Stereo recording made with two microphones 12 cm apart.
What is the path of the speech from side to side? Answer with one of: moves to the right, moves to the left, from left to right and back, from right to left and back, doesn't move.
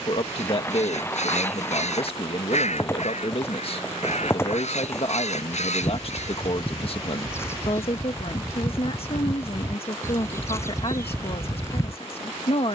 doesn't move.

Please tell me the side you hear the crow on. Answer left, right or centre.
left.